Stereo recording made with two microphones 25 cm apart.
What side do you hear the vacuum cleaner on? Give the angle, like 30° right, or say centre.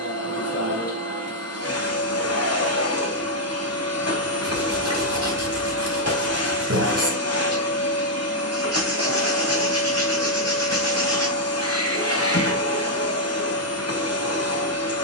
80° left.